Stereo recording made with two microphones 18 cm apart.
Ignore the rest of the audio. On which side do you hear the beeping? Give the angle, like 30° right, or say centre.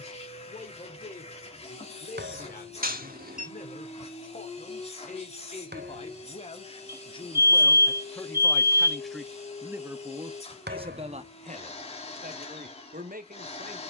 60° right.